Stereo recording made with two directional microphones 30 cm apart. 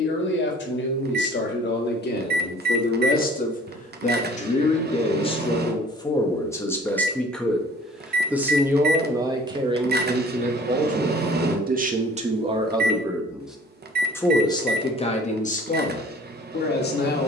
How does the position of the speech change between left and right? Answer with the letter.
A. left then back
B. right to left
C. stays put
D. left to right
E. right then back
E.